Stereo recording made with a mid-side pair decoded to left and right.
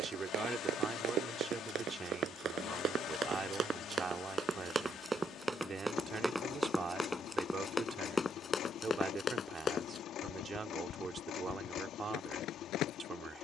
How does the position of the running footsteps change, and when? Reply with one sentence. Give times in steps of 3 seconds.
You can hear the running footsteps on the right from 0 s, in the centre from 6 s and on the left from 9 s.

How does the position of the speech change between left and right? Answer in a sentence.
You can hear the speech stay in one place.